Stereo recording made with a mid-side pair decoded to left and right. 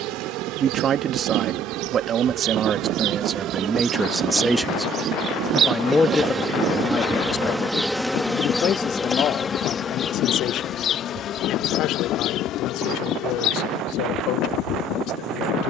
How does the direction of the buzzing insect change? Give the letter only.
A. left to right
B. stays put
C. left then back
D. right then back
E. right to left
E.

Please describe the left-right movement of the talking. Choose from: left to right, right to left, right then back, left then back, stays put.
right to left.